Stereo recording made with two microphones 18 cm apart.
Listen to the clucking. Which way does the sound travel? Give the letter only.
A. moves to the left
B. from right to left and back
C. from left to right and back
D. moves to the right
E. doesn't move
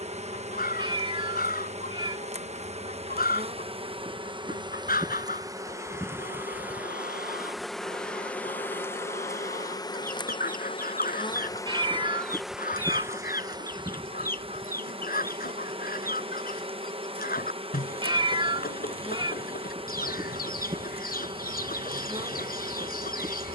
E.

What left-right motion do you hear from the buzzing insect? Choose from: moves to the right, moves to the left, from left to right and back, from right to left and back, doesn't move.
from right to left and back.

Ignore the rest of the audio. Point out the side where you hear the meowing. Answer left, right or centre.
right.